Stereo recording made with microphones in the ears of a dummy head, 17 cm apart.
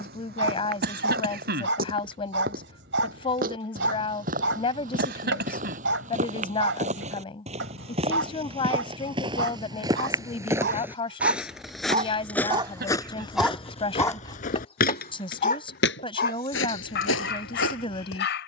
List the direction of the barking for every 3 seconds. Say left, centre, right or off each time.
right, right, right, right, centre, left.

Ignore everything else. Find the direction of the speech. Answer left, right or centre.
left.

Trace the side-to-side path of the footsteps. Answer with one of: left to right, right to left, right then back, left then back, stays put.
right to left.